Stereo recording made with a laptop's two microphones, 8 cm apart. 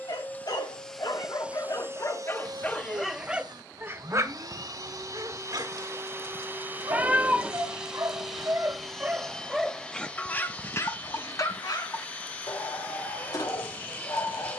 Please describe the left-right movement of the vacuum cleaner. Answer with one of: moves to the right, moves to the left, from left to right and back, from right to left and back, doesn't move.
from left to right and back.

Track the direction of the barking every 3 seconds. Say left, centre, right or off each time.
left, right, right, left, left.